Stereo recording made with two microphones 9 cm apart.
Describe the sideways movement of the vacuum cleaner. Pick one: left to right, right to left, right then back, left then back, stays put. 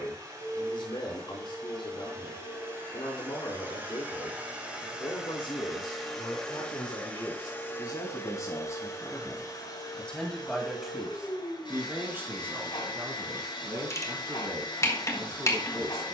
right to left.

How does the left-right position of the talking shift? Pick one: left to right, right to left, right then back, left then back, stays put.
left to right.